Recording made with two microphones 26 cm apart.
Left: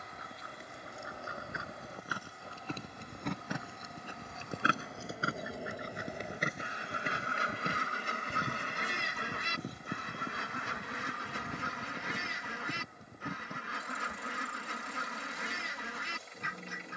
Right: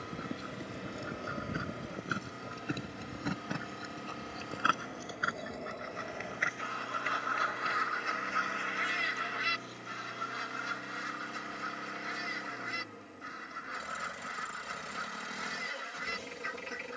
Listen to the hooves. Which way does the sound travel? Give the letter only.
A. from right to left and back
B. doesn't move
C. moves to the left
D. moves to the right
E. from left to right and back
C.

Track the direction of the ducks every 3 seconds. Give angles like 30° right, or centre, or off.
20° right, centre, 30° left, 60° left, 70° left, 70° left.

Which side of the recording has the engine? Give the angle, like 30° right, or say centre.
80° right.